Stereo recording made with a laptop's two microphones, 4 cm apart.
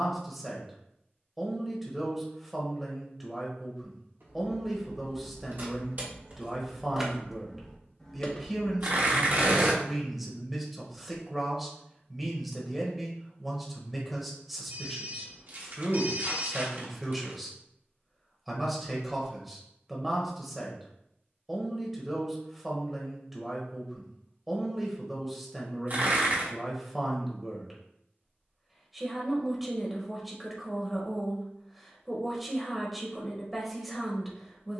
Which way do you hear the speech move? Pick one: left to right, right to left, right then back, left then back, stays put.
stays put.